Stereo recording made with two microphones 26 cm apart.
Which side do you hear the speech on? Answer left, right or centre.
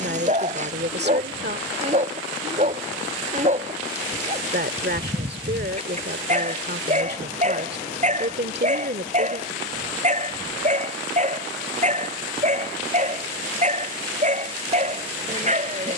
right.